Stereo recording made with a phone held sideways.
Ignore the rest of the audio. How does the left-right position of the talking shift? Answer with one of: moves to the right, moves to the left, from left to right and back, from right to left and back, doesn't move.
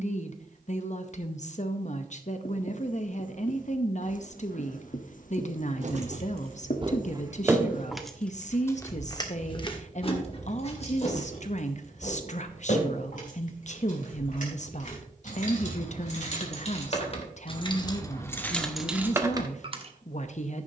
doesn't move.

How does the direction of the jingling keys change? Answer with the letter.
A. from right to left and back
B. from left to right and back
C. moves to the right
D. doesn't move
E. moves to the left
A.